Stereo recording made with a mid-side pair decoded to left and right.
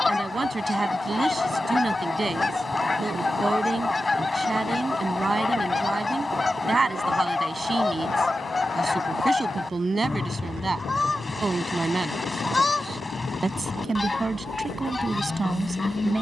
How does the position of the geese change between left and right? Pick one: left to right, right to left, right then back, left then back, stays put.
stays put.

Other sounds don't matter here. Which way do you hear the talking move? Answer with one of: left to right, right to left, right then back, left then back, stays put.
stays put.